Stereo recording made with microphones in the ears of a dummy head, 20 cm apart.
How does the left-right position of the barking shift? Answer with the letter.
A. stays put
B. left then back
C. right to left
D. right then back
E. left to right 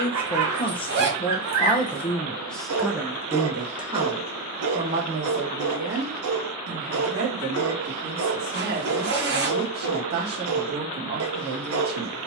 A.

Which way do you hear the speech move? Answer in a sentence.
In this clip you hear the speech move from left to right.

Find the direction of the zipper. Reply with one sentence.
You can hear the zipper on the right.